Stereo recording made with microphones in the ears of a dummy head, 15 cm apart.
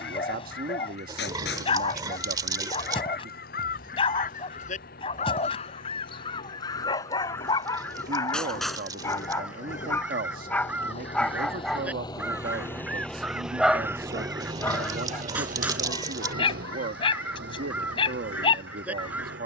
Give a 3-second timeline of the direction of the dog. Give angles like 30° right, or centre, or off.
30° left, 30° left, 20° left, 10° left, centre, 30° left, 30° left.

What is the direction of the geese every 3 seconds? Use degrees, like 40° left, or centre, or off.
70° left, 50° left, 20° left, 10° right, 10° right, 10° right, 10° right.